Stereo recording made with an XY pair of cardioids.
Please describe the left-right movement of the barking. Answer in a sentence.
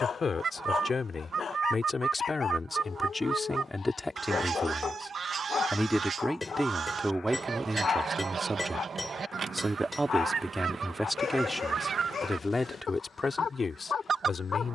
In this clip you hear the barking stay in one place.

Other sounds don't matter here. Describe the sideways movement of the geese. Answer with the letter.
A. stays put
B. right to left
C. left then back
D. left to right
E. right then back
A.